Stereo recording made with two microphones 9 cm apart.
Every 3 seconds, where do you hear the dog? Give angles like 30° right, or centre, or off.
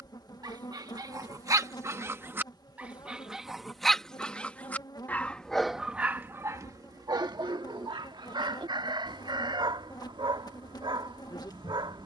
40° right, centre, 50° right, 60° right.